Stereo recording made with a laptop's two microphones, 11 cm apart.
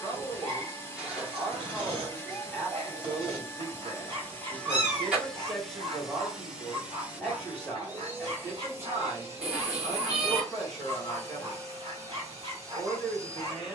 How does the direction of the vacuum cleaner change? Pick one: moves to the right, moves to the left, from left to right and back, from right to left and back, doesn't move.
moves to the right.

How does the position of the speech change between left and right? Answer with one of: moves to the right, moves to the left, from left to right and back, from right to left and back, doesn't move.
doesn't move.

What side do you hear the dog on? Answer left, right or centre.
right.